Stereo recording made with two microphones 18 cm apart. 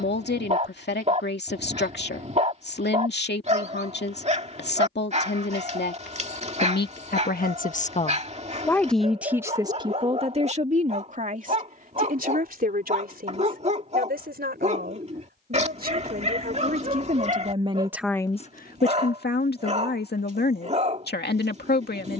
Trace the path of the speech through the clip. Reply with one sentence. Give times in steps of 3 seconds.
You can hear the speech on the left from 0 s, on the right from 9 s and on the left from 18 s.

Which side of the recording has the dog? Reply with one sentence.
You can hear the dog on the right.